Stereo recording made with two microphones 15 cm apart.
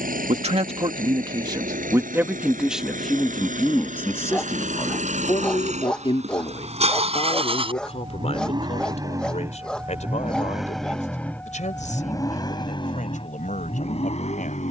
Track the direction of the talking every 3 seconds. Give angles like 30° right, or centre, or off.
30° right, 20° left, 40° left, 50° left, 60° left.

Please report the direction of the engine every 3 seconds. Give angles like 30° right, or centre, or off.
60° right, 60° right, 40° right, centre, 40° left.